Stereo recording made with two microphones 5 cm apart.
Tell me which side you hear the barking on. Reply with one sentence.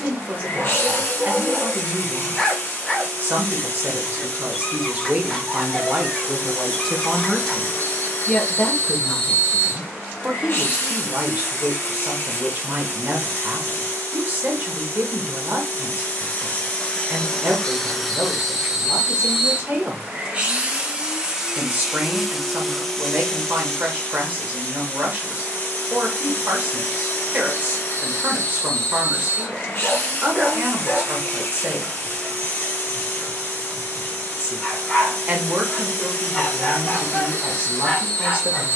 You can hear the barking in the centre.